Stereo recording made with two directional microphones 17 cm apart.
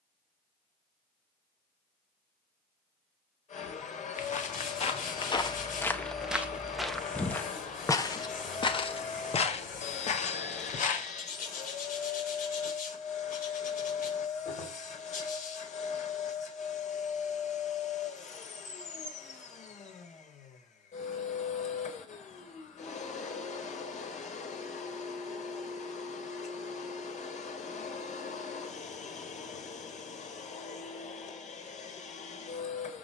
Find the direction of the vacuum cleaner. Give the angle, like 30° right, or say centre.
40° left.